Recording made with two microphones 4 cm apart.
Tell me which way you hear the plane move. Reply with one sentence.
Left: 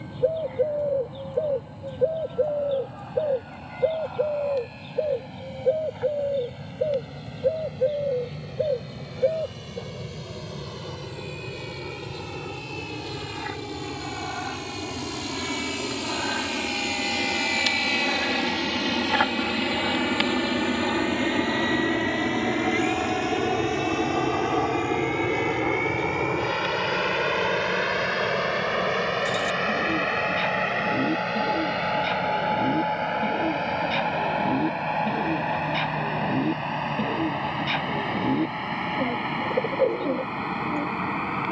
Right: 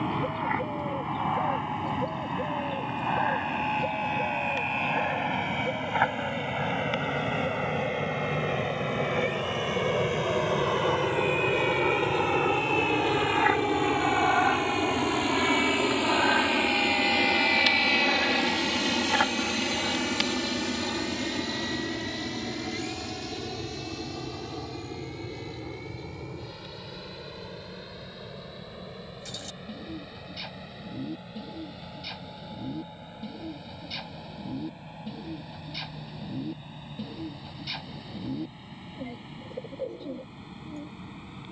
You can hear the plane move from right to left.